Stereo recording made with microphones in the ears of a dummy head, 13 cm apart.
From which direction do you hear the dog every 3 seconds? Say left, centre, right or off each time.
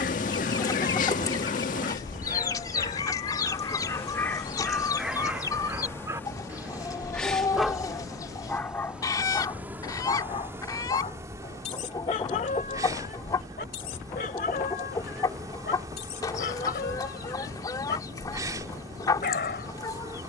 left, centre, centre, left, left, left, left.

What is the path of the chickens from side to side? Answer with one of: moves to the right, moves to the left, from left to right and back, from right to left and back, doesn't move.
doesn't move.